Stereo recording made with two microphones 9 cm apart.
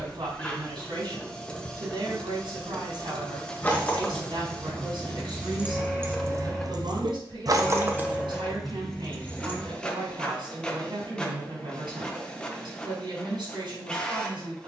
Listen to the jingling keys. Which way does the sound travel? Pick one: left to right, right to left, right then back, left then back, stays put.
right then back.